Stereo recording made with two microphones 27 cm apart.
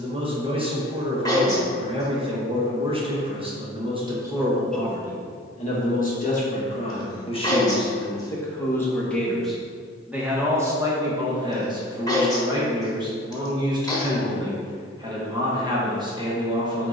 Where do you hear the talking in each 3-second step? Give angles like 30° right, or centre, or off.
20° right, centre, 20° left, 10° right, 20° right, 20° right.